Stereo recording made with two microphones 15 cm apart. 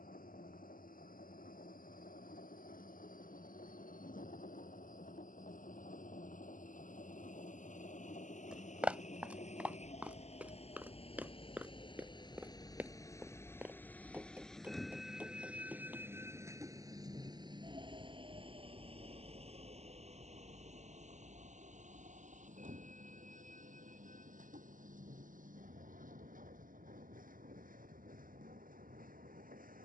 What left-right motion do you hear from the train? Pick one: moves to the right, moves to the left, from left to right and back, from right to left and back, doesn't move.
moves to the right.